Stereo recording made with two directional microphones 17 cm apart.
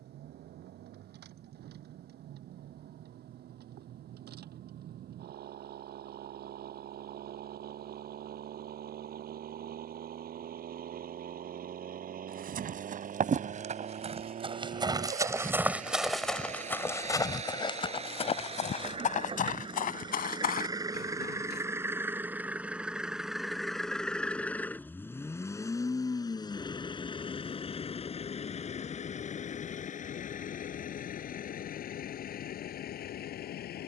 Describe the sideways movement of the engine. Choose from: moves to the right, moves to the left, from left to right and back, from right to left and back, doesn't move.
moves to the left.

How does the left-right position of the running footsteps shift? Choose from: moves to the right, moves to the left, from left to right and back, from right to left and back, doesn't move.
moves to the left.